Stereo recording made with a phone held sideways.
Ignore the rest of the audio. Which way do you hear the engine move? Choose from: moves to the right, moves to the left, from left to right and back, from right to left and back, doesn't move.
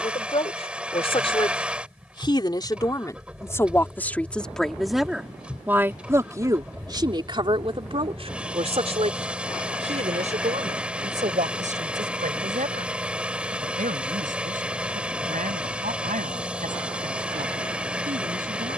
doesn't move.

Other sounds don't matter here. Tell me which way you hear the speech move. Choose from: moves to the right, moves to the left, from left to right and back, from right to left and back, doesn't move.
moves to the right.